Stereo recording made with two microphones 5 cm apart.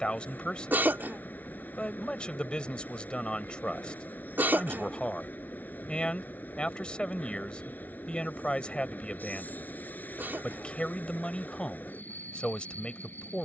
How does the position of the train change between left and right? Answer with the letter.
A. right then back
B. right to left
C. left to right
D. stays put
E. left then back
D.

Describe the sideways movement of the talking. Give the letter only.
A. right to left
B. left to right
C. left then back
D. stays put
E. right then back
D.